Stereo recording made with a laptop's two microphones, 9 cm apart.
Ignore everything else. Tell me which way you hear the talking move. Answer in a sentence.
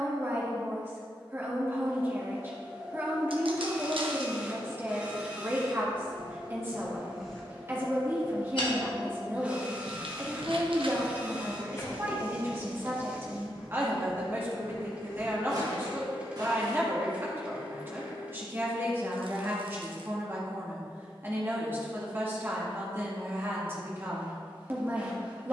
You can hear the talking stay in one place.